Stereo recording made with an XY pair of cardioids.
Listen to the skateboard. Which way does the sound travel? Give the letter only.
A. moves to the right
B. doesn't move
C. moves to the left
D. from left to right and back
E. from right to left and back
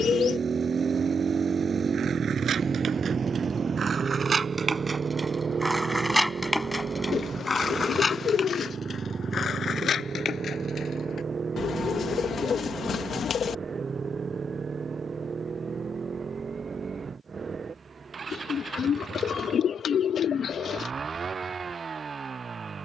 C.